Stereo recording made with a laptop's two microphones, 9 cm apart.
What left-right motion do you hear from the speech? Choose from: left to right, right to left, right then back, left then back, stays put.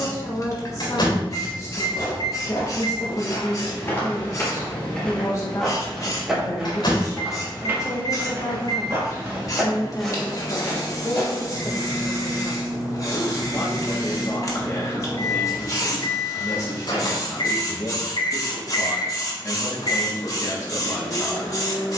stays put.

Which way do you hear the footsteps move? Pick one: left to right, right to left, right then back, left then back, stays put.
right then back.